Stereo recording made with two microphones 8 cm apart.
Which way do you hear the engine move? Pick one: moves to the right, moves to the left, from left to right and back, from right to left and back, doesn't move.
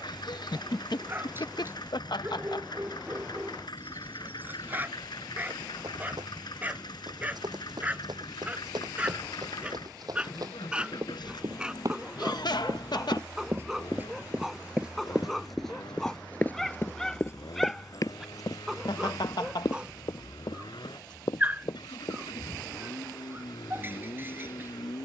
doesn't move.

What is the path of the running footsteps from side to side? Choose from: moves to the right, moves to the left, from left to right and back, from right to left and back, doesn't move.
moves to the left.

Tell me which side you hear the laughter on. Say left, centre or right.
left.